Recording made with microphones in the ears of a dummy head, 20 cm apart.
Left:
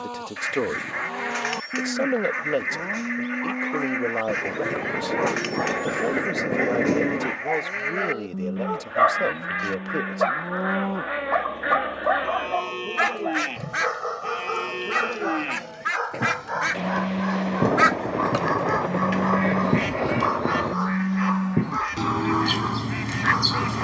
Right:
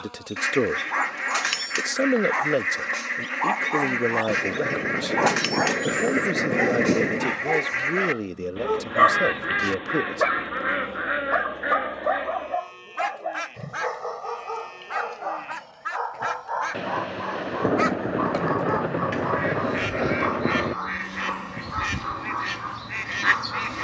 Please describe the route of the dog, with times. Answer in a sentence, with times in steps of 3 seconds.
In this clip you hear the dog on the right from 0 s, in the centre from 12 s and on the left from 15 s.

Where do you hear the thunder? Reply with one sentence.
In this clip you hear the thunder in the centre.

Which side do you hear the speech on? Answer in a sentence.
You can hear the speech on the right.